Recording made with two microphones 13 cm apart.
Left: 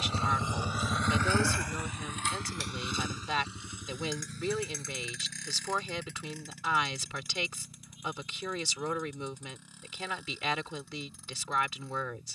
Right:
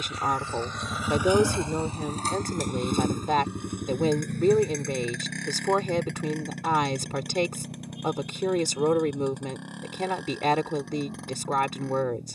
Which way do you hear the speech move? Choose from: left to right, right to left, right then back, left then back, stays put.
stays put.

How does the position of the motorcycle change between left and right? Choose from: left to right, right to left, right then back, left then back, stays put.
left to right.